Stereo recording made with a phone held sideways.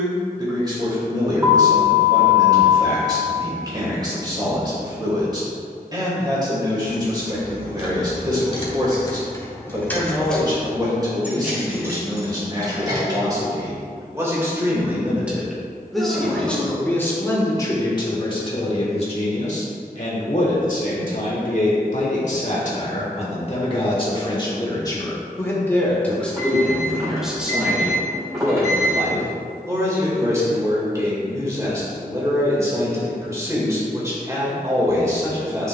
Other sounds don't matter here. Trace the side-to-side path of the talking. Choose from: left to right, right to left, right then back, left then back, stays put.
left then back.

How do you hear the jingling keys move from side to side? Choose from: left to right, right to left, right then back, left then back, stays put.
left to right.